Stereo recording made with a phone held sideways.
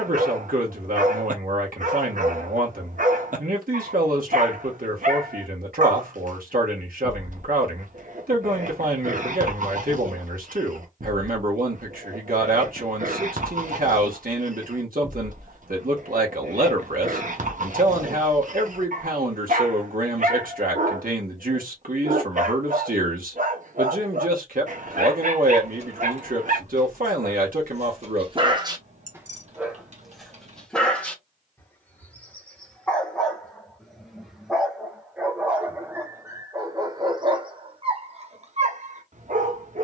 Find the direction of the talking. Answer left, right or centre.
right.